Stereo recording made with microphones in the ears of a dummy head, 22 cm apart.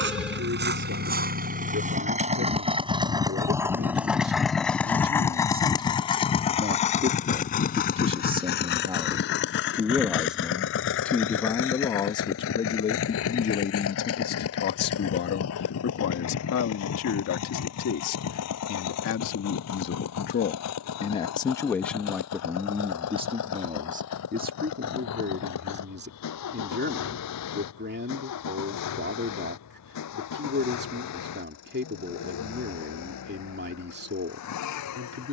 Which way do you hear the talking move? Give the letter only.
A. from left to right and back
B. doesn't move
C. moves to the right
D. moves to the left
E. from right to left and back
E.